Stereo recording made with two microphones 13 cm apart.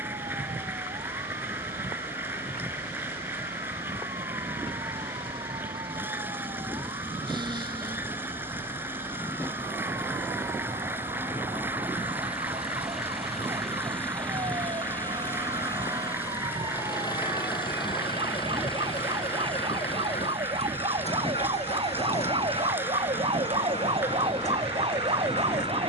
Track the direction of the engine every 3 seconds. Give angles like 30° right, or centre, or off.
50° right, 50° right, 40° right, 20° right, centre, 30° left, 50° left, 60° left, 70° left.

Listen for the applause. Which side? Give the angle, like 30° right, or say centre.
20° right.